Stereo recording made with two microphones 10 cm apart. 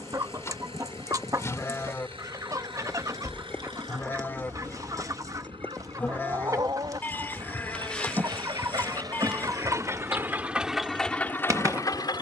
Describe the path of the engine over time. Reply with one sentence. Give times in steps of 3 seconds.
In this clip you hear the engine on the right from 0 s and in the centre from 9 s.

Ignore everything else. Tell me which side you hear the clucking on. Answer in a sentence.
In this clip you hear the clucking on the right.